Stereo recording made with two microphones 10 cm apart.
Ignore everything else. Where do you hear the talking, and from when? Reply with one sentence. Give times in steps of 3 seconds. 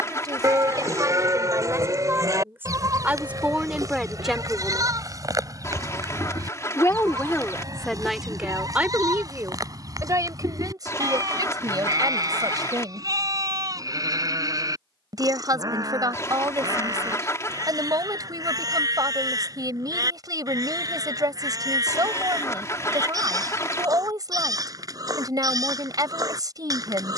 You can hear the talking on the right from 0 s, in the centre from 3 s and on the right from 9 s.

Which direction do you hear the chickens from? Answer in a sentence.
You can hear the chickens on the left.